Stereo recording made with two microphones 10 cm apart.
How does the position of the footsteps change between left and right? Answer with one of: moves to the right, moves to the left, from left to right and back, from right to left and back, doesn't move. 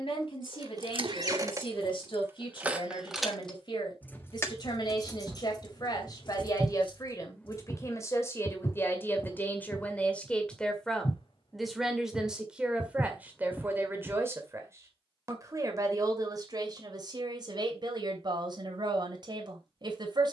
from right to left and back.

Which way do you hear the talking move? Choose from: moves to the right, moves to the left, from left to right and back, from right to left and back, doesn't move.
moves to the right.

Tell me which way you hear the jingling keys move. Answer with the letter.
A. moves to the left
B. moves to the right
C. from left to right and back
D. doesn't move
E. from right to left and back
A.